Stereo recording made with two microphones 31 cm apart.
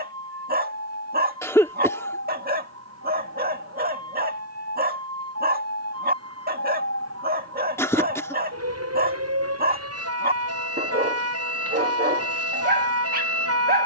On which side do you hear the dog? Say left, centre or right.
right.